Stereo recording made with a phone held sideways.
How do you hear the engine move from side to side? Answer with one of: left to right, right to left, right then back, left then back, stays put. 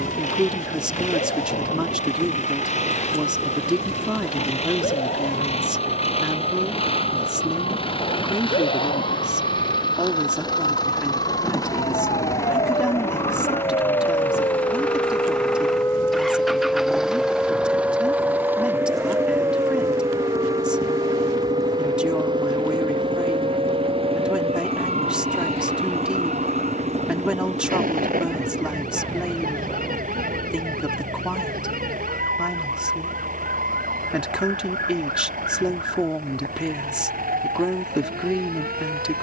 left to right.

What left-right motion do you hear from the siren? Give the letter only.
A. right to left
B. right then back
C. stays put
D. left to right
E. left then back
D.